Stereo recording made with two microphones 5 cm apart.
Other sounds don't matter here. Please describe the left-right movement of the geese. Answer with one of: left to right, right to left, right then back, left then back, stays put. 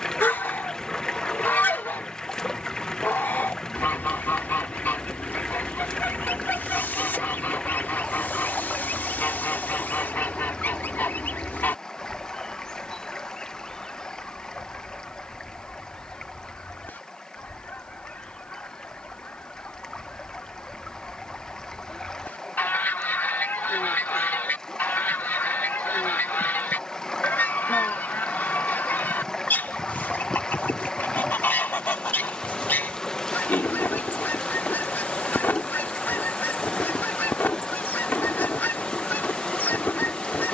stays put.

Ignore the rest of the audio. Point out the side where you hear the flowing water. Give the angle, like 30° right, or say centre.
20° left.